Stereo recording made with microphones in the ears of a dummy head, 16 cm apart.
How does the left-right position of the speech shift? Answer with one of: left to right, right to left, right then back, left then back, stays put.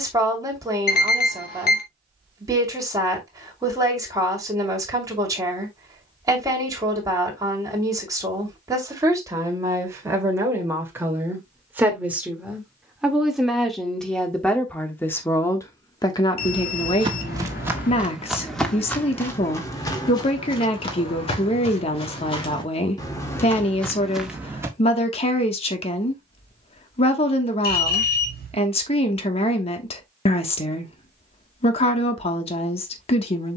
right to left.